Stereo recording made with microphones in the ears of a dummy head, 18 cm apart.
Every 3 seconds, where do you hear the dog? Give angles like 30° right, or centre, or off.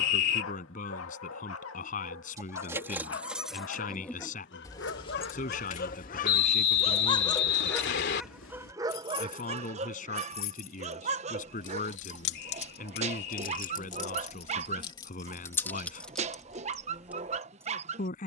70° left, 60° left, 10° left, 30° right, 30° right, 30° right.